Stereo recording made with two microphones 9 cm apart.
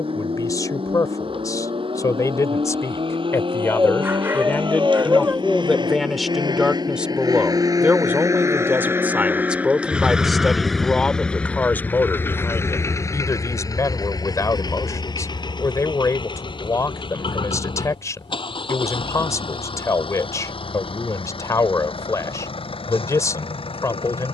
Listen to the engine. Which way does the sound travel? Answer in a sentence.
You can hear the engine go from the right side to the left.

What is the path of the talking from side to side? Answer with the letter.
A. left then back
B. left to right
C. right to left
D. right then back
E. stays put
D.